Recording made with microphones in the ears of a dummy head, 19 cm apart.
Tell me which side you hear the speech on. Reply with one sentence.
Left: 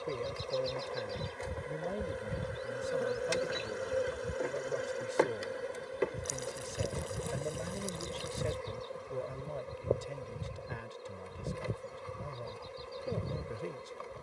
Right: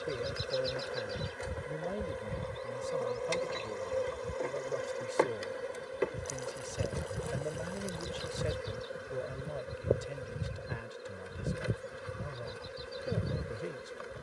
You can hear the speech in the centre.